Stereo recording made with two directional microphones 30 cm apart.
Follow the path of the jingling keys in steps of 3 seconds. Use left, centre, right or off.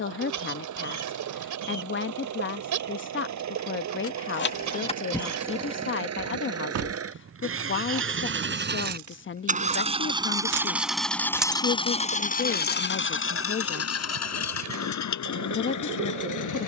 off, centre, right, right, left, off.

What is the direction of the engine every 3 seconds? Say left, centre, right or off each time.
right, right, right, centre, left, left.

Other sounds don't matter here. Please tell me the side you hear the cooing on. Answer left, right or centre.
right.